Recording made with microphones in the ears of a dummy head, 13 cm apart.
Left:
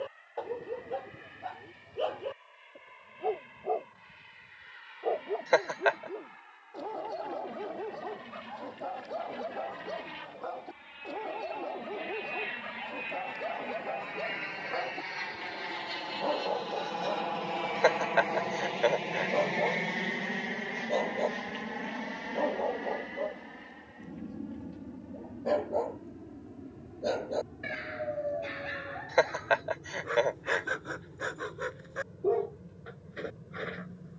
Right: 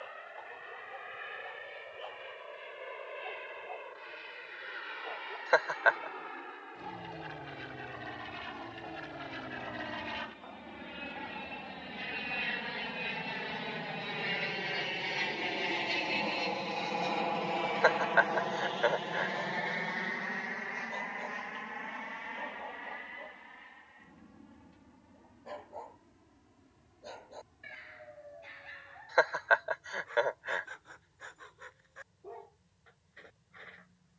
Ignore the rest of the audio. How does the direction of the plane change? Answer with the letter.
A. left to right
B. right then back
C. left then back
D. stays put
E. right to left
E.